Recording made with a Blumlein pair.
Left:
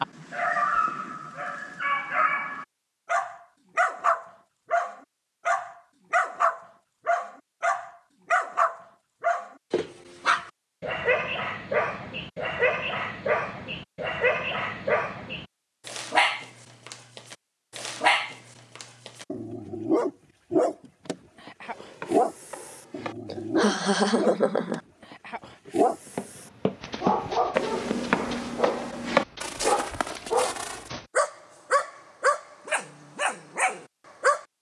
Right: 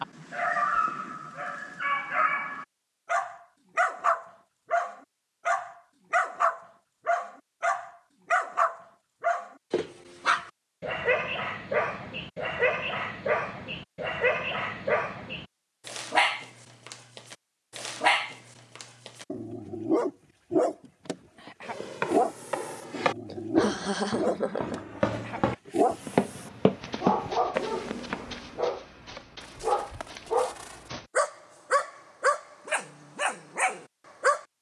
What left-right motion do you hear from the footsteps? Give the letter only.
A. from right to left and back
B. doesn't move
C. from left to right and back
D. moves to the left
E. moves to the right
D.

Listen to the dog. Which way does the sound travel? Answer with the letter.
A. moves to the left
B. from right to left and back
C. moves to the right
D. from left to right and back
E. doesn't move
E.